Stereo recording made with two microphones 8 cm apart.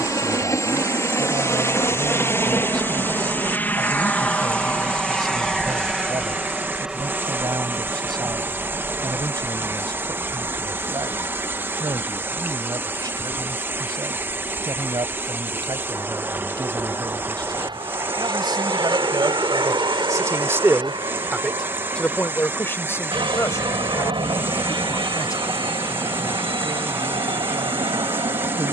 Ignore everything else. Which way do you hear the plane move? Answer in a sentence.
In this clip you hear the plane go from the left side to the right.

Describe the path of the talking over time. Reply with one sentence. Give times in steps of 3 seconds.
In this clip you hear the talking on the right from 0 s and on the left from 21 s.